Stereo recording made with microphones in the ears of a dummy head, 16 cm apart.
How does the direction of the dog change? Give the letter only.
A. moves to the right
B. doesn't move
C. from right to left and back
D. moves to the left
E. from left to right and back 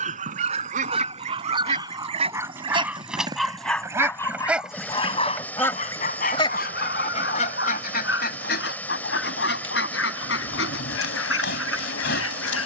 D.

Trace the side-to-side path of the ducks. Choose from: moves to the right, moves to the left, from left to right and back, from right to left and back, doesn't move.
moves to the left.